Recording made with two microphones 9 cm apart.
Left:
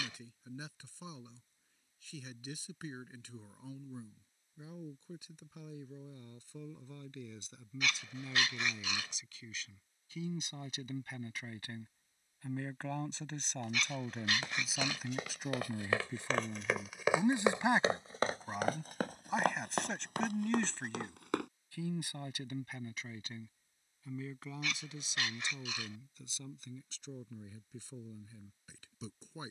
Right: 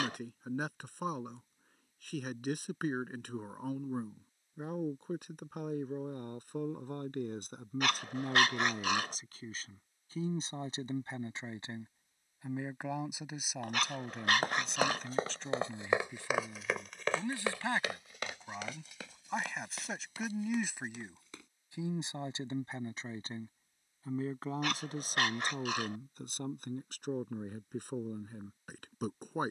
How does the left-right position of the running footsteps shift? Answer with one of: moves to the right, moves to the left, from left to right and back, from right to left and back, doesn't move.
moves to the left.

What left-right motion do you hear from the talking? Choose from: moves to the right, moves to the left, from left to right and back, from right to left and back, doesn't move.
from right to left and back.